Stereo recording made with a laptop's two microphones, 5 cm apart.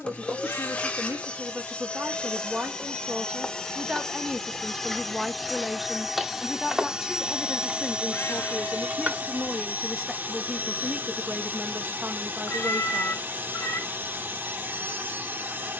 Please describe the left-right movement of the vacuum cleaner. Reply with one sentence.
In this clip you hear the vacuum cleaner move from left to right.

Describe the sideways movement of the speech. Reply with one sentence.
You can hear the speech go left and come back.